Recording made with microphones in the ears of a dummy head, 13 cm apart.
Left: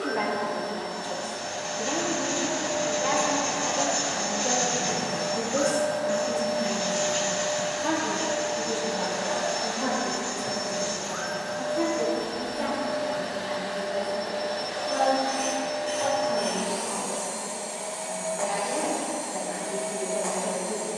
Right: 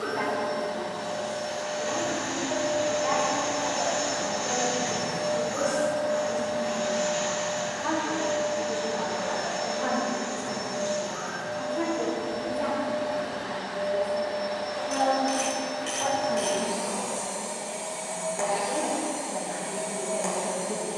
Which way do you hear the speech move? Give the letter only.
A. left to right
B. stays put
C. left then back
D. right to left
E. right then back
A.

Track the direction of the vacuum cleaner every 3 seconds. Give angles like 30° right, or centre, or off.
40° right, 20° right, 30° left, 70° left, 60° left, centre, 40° right.